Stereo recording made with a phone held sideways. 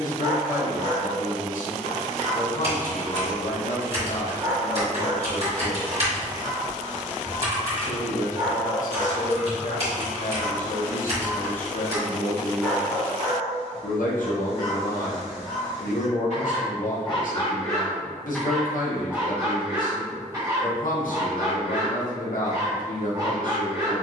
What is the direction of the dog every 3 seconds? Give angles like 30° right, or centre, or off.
30° right, 30° right, 30° right, 30° right, 30° left, 40° left, 20° right, 30° right.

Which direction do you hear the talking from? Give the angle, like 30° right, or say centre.
80° left.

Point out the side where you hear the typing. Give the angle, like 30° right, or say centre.
50° right.